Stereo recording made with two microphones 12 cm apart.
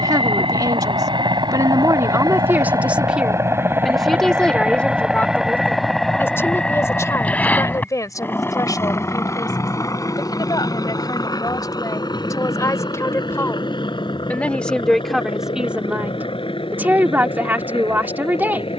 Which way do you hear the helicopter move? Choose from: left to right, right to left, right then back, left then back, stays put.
right to left.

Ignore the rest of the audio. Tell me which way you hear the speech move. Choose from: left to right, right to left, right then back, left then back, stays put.
left then back.